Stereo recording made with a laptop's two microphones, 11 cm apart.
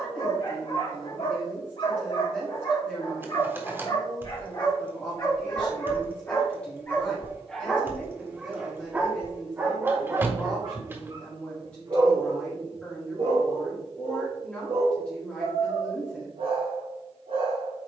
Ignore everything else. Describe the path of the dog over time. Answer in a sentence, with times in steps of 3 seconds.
You can hear the dog on the left from 0 s, in the centre from 6 s and on the right from 9 s.